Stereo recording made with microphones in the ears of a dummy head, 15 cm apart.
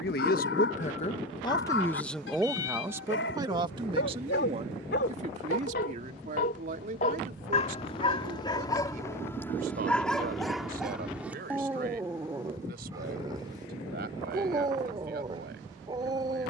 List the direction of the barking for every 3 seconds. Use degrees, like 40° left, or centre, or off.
80° left, 70° left, 30° left, centre, 20° right, 30° right.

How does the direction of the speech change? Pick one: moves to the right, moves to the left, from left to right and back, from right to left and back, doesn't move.
moves to the right.